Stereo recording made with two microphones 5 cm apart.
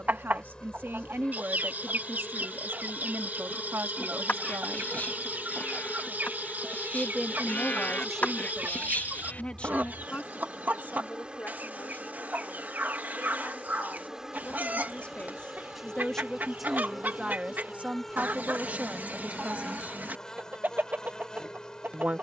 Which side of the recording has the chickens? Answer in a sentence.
In this clip you hear the chickens on the right.